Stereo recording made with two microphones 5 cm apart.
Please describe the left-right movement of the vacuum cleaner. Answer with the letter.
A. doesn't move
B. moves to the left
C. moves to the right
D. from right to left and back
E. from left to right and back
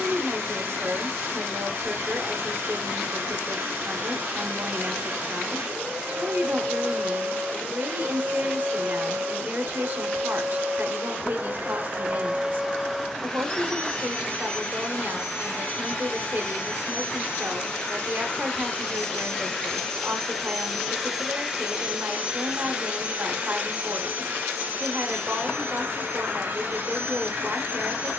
D.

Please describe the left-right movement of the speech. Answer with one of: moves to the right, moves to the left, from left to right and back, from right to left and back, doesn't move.
doesn't move.